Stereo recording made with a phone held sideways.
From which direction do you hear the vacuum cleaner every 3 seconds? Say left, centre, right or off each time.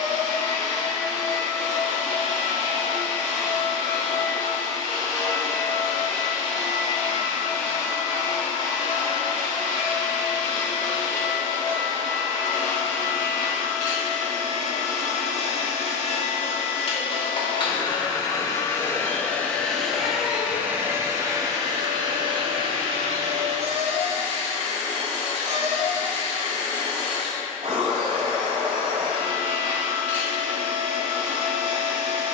left, left, left, left, left, left, centre, right, right, right, right.